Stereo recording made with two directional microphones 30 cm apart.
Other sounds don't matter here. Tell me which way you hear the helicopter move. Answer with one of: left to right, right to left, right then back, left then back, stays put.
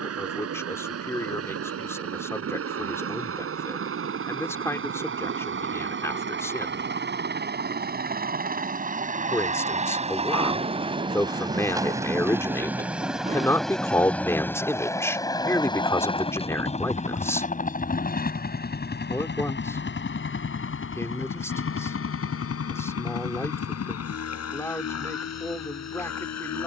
right to left.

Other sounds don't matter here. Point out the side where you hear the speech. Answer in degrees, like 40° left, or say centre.
10° left.